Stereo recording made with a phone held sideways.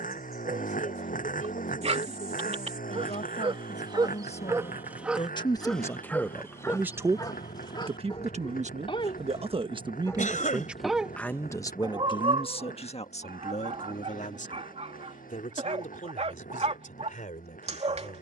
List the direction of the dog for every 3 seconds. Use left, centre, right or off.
right, right, left, centre, right, right.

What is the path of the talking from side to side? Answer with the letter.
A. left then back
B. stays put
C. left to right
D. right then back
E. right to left
D.